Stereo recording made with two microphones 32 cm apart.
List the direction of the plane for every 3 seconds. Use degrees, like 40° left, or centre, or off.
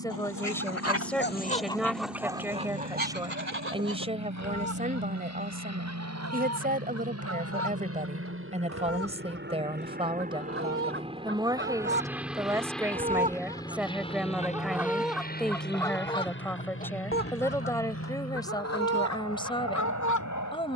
70° right, 60° right, 50° right, 20° right, 10° left, 30° left, 50° left.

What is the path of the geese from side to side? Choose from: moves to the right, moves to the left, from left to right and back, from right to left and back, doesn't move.
from left to right and back.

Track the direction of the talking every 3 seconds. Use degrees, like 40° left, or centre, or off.
centre, 20° right, 20° right, 10° right, centre, 10° left, 10° left.